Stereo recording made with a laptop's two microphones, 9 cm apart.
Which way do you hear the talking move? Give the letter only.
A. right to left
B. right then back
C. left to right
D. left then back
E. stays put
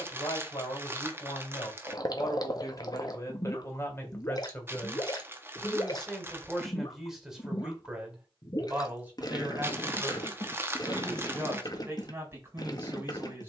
C.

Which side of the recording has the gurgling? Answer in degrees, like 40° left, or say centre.
40° left.